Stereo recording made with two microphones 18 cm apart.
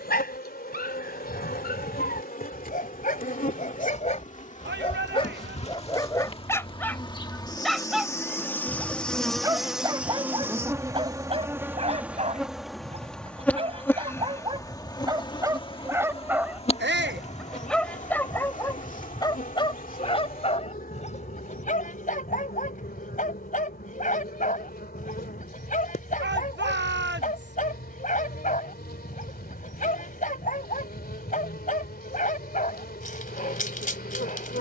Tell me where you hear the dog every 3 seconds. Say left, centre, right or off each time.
left, left, centre, right, right, centre, left, left, left, left, left, left.